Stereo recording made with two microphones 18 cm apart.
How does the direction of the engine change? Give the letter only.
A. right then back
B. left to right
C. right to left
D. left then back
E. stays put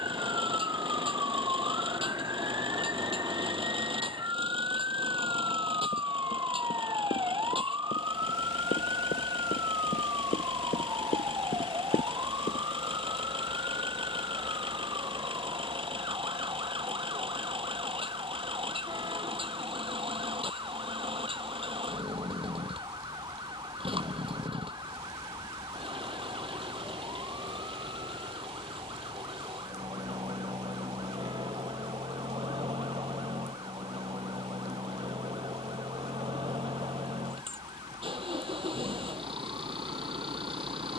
E.